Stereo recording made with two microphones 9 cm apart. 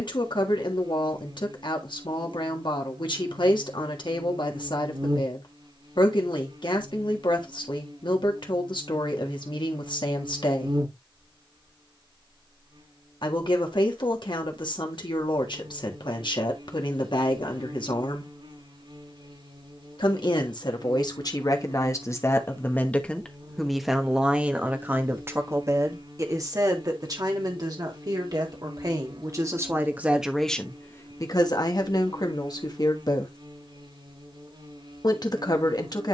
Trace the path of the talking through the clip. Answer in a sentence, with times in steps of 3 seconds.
You can hear the talking on the left from 0 s, on the right from 24 s and on the left from 30 s.